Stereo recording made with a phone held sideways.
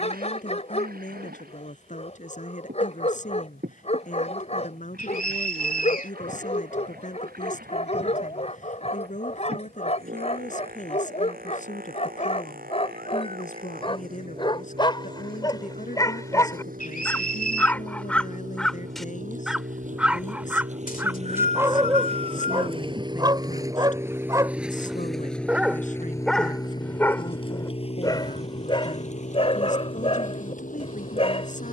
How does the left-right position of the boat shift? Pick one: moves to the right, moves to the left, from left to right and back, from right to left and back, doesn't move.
moves to the left.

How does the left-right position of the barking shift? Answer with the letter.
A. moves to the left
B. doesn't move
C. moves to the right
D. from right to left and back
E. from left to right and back
E.